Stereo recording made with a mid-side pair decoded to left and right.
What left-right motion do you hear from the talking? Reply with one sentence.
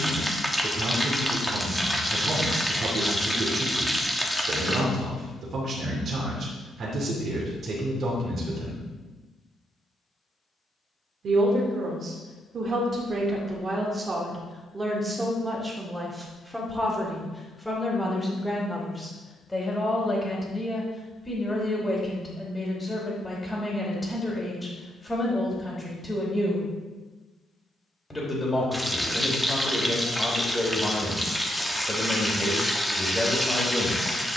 You can hear the talking move from right to left.